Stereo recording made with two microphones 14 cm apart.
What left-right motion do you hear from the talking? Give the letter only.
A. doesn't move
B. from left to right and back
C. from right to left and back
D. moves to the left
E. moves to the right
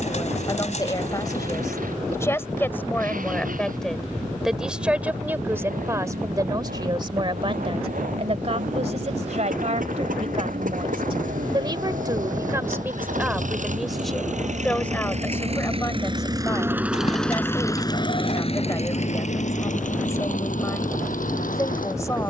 B.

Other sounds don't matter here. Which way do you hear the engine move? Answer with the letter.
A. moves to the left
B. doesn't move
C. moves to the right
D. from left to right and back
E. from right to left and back
A.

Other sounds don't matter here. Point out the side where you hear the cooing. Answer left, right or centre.
left.